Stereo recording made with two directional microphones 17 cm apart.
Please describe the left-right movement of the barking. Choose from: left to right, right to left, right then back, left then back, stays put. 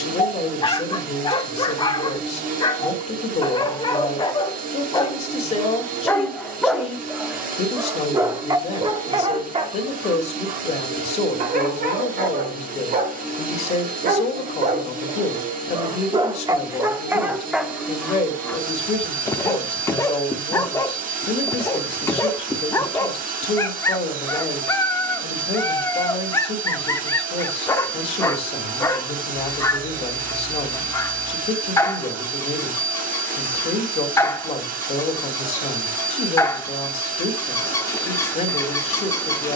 right then back.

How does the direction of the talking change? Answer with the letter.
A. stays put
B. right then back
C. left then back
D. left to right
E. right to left
A.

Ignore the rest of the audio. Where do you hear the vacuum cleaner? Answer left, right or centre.
right.